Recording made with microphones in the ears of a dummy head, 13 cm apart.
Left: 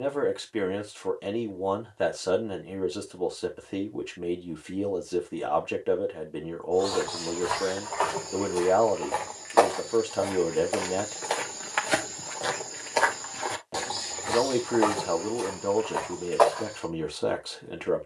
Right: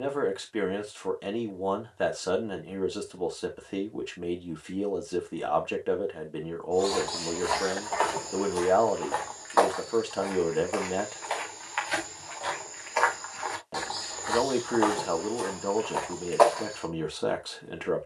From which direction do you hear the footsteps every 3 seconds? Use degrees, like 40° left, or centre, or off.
off, off, centre, 40° left, 30° left, centre.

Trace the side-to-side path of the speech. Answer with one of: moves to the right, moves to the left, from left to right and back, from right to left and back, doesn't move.
doesn't move.